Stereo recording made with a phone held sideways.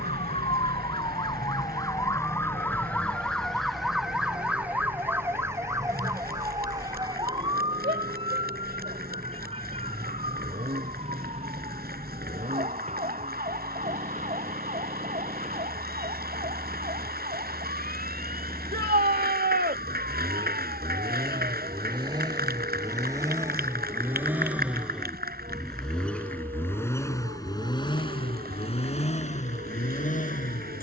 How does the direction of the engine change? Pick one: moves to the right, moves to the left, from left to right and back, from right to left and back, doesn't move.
moves to the left.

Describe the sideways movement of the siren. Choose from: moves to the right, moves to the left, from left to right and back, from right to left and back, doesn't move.
moves to the right.